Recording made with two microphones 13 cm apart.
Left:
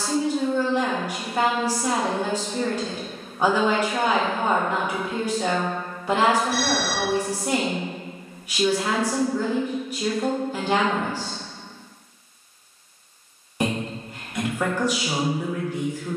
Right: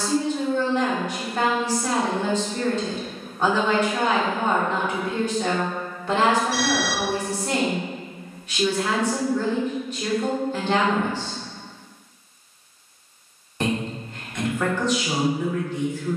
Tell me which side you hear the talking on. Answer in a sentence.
You can hear the talking in the centre.